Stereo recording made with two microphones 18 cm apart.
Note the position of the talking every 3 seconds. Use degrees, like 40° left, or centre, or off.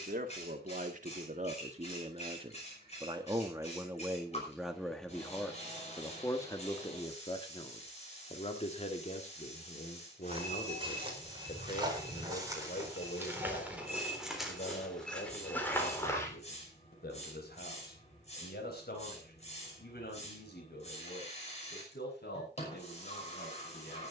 40° right, 10° right, 30° left, 40° left, 50° left, 60° left, 60° left, 70° left.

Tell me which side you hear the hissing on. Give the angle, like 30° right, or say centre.
40° left.